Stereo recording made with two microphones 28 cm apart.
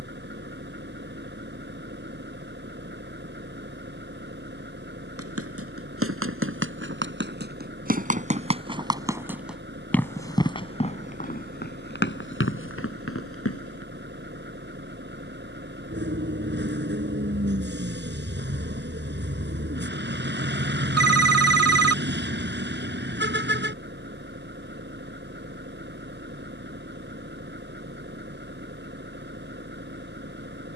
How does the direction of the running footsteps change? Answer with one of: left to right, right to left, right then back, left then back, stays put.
right to left.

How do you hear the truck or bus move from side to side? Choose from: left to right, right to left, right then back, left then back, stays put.
stays put.